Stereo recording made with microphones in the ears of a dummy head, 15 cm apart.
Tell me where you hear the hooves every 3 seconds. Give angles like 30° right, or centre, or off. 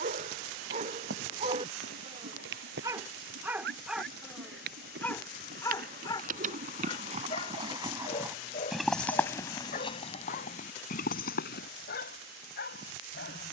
70° right, 60° right, 30° right, 40° left, off.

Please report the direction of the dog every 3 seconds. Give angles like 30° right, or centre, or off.
40° right, centre, 30° left, 50° left, 60° left.